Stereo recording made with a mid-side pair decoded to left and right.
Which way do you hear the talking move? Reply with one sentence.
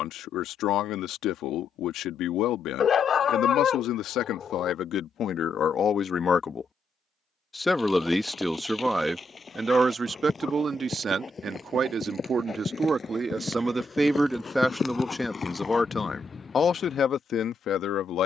In this clip you hear the talking go right and come back.